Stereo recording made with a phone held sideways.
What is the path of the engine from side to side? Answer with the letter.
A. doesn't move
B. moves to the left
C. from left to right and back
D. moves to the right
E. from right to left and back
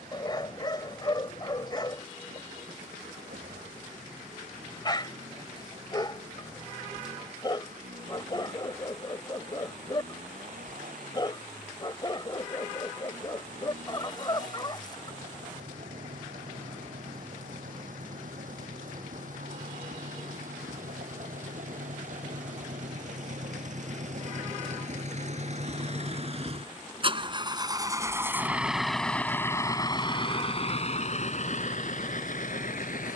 B.